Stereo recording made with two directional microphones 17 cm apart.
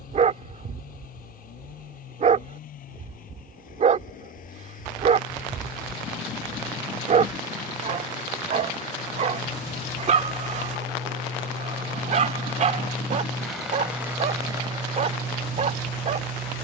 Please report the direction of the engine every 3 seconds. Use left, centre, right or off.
left, left, left, left, centre, right.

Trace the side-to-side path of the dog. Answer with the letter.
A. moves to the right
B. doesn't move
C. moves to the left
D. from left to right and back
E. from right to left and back
B.